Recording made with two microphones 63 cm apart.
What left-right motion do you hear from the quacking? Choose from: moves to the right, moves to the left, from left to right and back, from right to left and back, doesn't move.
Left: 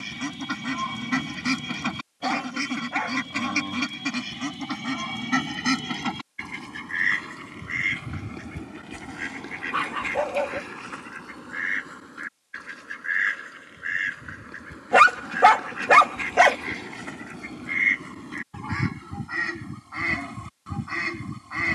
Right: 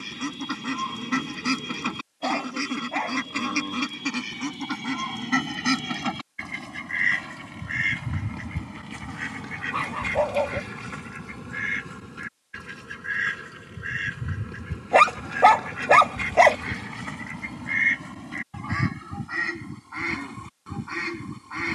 from left to right and back.